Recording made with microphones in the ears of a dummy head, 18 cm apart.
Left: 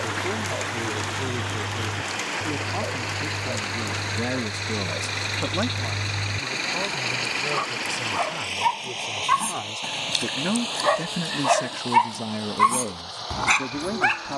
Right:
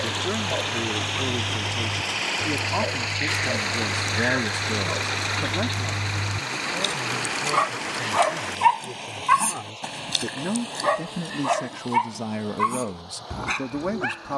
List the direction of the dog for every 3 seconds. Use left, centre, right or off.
right, right, right, centre, left.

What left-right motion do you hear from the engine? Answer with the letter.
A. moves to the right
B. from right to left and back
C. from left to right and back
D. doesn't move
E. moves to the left
E.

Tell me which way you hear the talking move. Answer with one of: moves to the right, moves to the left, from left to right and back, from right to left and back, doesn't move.
from right to left and back.